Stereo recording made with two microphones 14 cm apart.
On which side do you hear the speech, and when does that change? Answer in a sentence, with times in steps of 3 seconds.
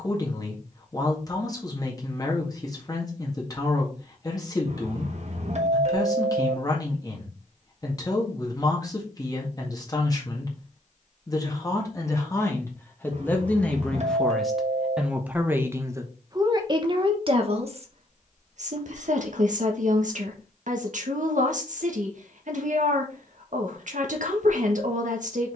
You can hear the speech on the left from 0 s, in the centre from 12 s and on the right from 15 s.